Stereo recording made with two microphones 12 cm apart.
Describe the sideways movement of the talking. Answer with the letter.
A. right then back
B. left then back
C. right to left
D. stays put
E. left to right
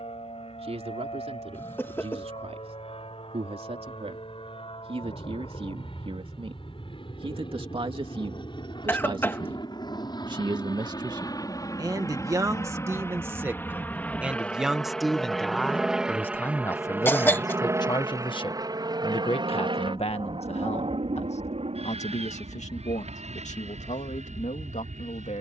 C.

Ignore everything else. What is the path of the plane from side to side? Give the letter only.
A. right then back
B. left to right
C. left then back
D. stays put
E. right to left
B.